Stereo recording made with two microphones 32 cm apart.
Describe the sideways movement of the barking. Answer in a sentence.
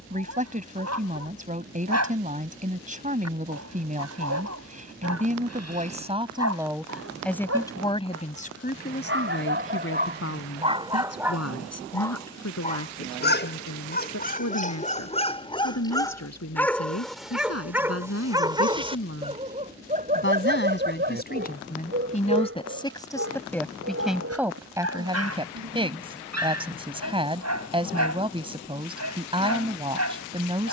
You can hear the barking move from right to left and back again.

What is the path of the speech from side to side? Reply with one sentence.
In this clip you hear the speech move from right to left and back again.